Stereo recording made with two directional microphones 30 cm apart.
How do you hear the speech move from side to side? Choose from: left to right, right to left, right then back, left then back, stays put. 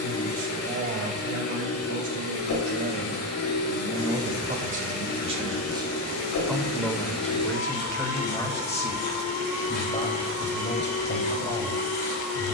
right to left.